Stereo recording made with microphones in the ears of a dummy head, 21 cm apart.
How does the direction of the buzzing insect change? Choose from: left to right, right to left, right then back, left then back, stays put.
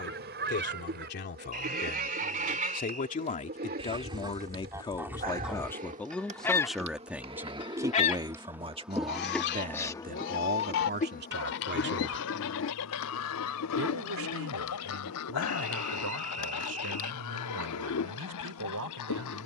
right to left.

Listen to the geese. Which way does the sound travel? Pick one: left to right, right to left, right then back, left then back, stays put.
right to left.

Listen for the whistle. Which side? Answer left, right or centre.
right.